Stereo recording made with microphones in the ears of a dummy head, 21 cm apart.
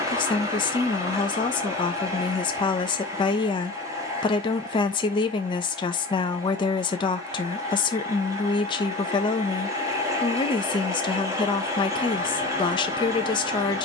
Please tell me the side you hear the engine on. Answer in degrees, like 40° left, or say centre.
10° right.